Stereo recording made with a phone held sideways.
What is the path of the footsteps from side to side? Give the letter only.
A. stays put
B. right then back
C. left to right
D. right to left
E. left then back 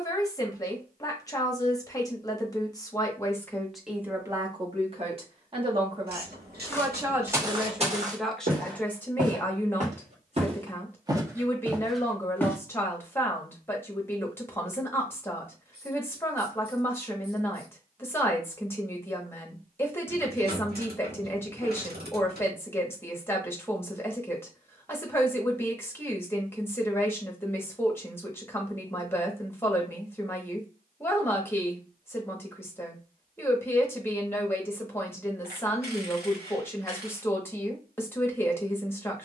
B.